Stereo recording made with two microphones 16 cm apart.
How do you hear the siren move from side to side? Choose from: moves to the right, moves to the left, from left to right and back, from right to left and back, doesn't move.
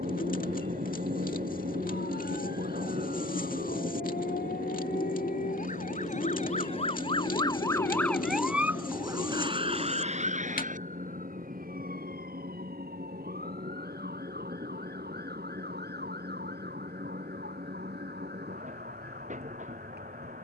moves to the right.